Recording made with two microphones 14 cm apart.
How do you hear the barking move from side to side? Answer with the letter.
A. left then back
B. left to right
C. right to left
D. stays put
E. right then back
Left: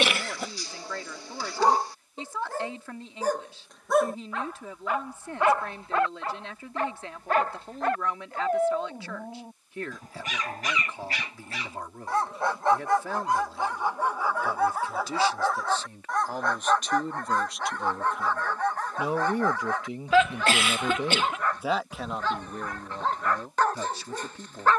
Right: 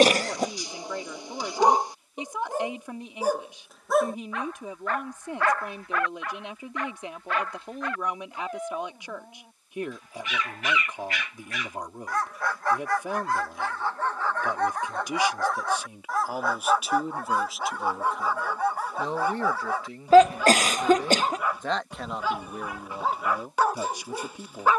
A.